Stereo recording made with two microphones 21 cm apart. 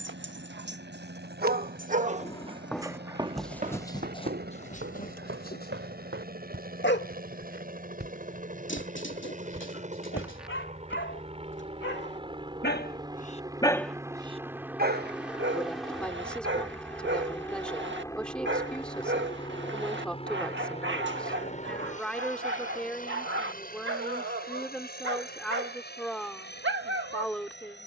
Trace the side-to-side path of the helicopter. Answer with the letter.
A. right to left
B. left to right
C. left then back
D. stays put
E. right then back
A.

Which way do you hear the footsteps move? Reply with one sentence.
You can hear the footsteps move from left to right and back again.